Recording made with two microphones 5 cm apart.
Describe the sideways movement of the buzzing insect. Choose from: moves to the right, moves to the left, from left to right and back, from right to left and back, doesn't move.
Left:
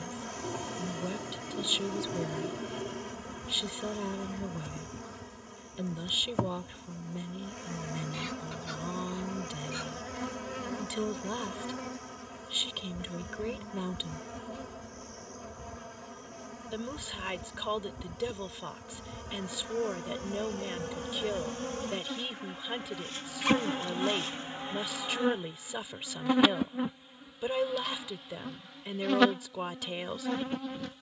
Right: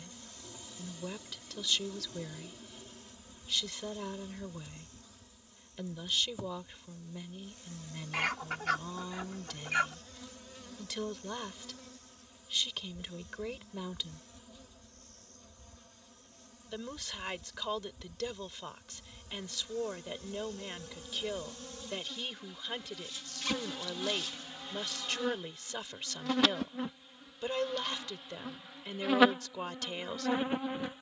moves to the right.